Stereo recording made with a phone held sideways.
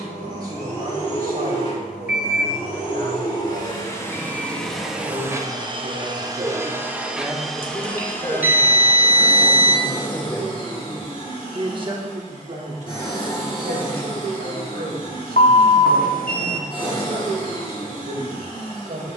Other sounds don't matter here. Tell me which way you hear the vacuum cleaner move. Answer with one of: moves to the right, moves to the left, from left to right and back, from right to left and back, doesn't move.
from left to right and back.